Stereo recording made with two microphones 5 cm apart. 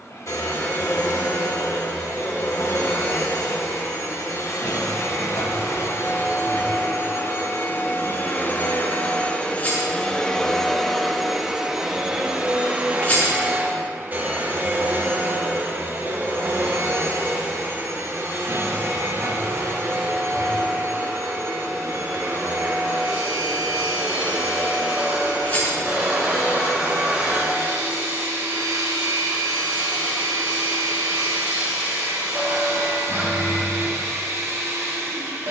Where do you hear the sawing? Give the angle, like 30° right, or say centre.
30° right.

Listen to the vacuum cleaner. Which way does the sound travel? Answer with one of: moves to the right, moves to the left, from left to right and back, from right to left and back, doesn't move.
moves to the right.